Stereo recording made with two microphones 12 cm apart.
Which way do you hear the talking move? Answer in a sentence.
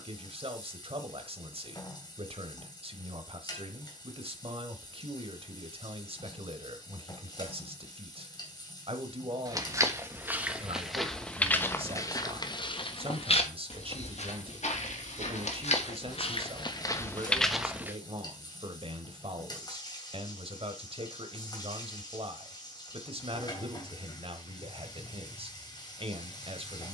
You can hear the talking stay put.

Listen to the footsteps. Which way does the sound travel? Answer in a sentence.
You can hear the footsteps move from right to left and back again.